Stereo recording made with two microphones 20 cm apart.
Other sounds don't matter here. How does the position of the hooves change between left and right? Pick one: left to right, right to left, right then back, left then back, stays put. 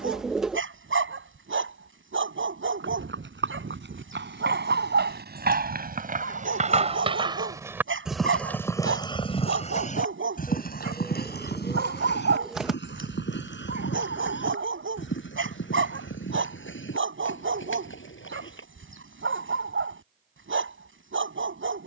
right to left.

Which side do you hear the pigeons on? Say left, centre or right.
centre.